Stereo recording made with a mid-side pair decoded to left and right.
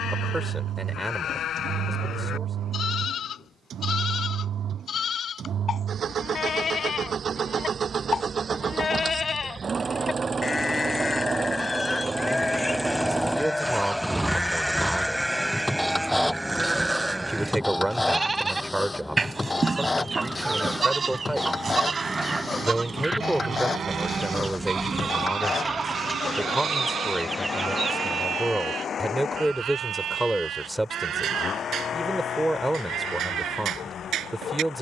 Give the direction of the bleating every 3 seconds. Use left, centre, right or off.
left, left, left, left, centre, centre, right, right, right, right, right, right.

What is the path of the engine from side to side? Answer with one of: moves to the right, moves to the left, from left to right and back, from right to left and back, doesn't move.
moves to the left.